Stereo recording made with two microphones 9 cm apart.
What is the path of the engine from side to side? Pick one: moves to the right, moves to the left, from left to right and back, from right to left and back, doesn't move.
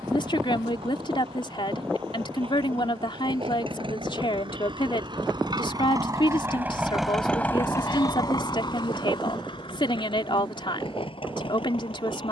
moves to the left.